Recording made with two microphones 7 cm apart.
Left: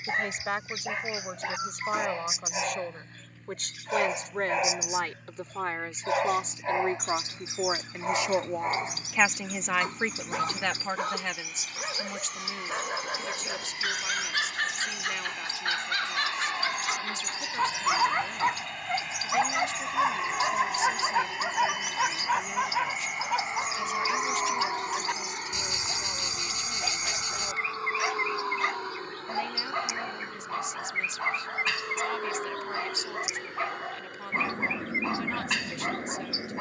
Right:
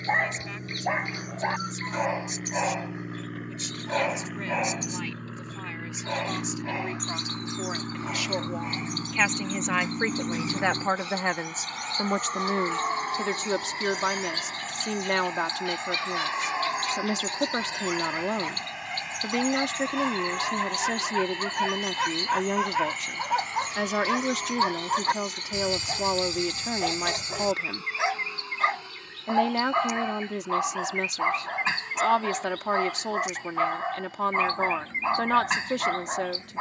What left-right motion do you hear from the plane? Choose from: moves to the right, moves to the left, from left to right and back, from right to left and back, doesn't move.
moves to the left.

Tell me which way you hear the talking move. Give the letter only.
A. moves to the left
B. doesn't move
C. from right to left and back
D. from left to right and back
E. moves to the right
E.